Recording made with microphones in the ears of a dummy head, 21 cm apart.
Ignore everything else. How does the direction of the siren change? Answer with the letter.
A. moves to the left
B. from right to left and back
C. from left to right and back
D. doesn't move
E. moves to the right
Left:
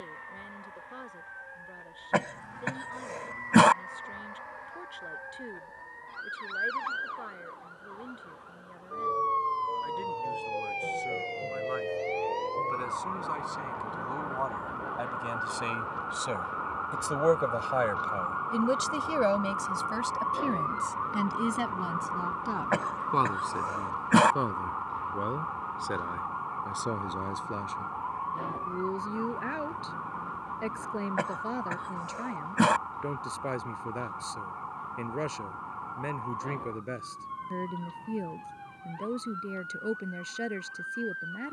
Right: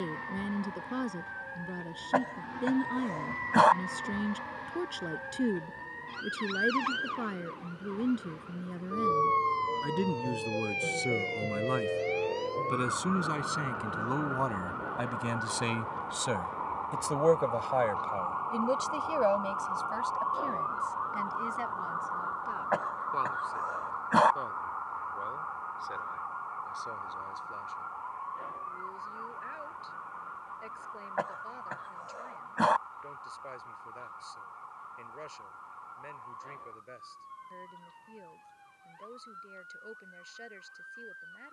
A.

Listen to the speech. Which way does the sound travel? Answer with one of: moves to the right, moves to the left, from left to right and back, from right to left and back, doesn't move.
moves to the left.